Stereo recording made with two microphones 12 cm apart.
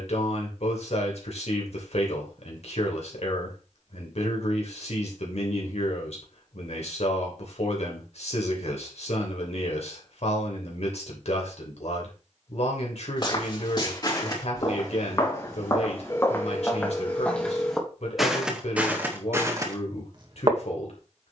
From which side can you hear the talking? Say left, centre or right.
left.